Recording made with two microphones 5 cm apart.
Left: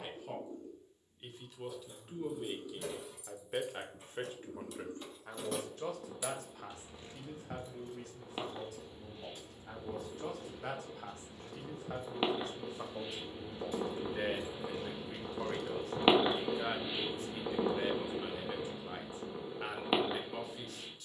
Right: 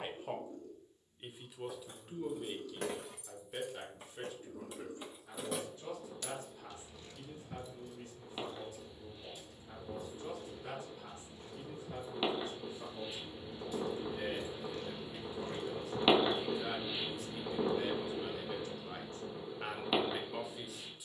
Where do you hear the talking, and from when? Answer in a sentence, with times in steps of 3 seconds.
In this clip you hear the talking in the centre from 0 s, on the left from 3 s and in the centre from 18 s.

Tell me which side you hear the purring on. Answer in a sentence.
You can hear the purring on the left.